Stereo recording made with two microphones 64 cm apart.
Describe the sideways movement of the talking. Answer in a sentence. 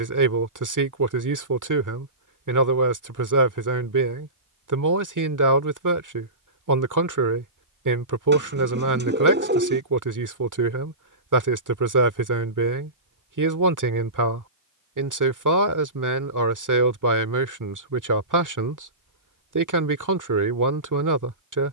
In this clip you hear the talking stay put.